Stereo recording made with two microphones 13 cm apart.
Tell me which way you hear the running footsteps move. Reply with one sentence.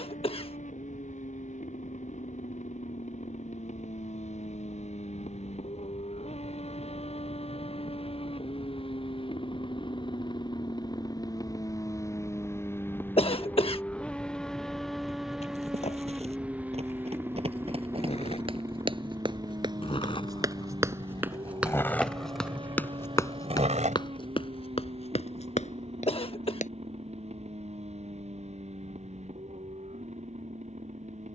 You can hear the running footsteps go from the right side to the left.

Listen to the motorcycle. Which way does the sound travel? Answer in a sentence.
In this clip you hear the motorcycle move from left to right.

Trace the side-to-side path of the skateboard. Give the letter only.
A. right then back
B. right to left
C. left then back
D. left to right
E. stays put
D.